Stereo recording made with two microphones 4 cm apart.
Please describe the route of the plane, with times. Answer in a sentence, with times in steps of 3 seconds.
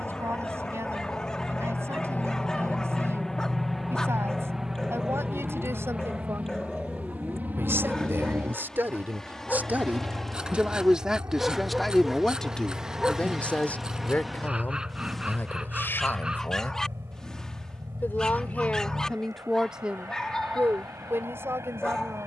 In this clip you hear the plane on the left from 0 s, in the centre from 3 s and on the right from 6 s.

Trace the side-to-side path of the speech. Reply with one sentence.
In this clip you hear the speech move from right to left and back again.